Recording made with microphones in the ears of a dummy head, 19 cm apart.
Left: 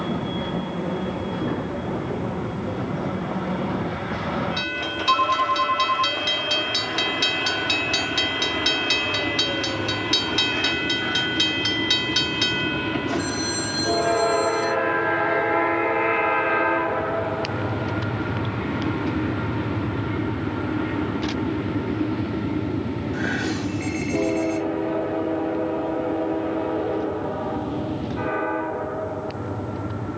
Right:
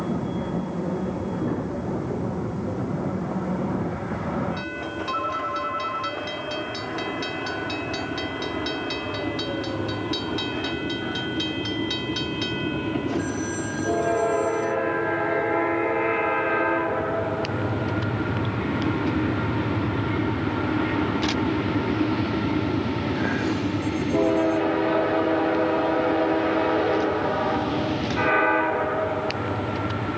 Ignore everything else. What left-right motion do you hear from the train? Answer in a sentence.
In this clip you hear the train go from the left side to the right.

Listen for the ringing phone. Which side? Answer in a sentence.
You can hear the ringing phone on the left.